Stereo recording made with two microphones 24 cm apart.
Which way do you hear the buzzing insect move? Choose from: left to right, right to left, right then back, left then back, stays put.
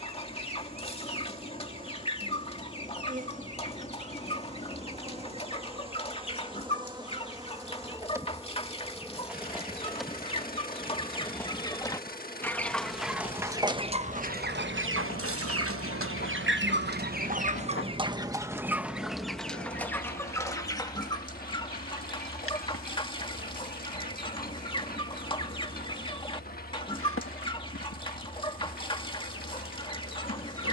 right to left.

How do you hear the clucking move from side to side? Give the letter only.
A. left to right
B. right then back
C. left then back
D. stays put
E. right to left
B.